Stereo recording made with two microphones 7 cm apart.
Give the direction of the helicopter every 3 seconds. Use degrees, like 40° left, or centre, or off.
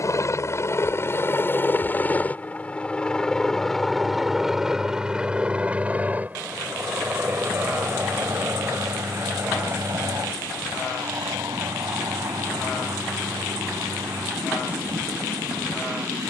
30° left, centre, 30° right, 40° right, 50° right, 50° right.